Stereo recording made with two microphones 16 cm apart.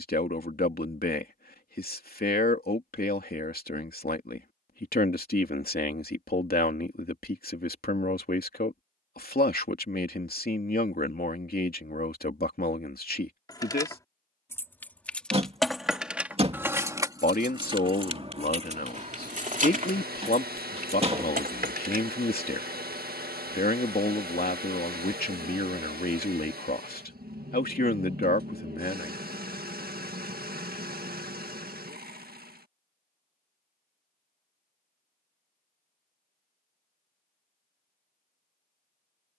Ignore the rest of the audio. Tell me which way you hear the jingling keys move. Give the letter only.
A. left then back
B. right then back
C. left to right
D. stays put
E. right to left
C.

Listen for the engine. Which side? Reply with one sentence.
In this clip you hear the engine on the right.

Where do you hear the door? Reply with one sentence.
You can hear the door on the right.